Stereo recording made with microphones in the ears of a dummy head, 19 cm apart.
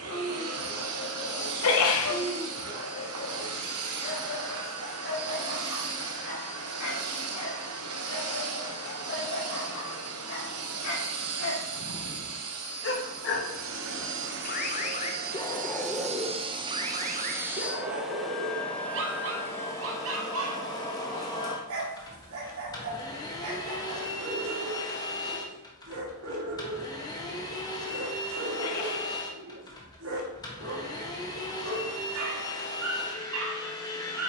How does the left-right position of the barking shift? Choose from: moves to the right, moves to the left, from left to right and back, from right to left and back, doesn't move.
moves to the right.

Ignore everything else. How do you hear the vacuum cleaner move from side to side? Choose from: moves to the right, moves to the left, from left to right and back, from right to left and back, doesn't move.
moves to the left.